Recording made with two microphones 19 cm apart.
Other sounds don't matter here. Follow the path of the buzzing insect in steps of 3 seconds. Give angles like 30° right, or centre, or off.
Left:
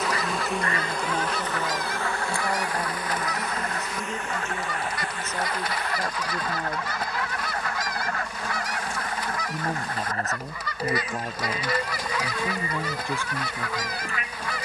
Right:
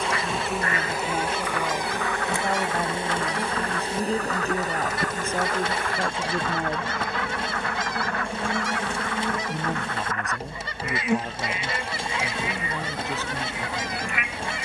10° right, 40° right, 60° right, 70° right, 70° right.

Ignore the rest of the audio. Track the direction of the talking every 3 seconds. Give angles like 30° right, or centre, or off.
10° right, 30° right, 20° right, centre, 10° left.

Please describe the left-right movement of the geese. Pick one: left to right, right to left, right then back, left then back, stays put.
stays put.